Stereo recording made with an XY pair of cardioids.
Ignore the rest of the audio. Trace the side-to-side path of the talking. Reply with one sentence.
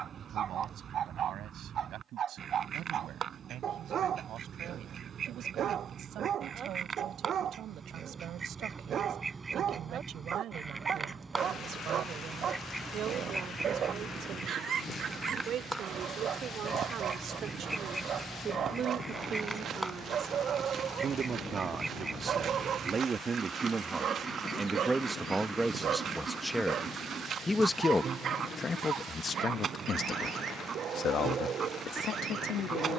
You can hear the talking move to the left.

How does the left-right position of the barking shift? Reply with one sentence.
In this clip you hear the barking stay put.